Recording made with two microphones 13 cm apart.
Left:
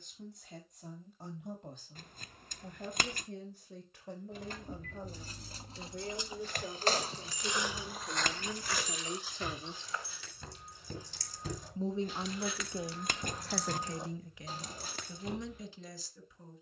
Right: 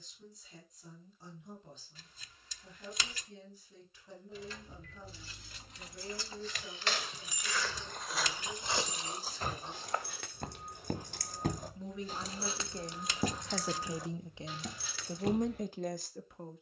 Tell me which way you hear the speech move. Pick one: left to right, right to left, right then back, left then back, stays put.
left to right.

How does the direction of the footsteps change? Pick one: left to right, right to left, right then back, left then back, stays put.
left to right.